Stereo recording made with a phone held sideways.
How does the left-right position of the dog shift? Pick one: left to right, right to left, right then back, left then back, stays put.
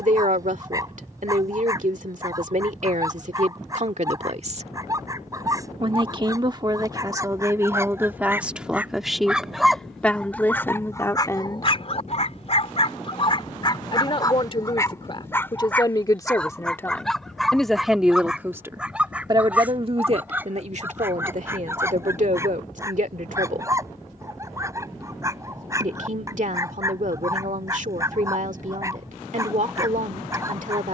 left then back.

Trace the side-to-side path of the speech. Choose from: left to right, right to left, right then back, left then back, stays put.
left then back.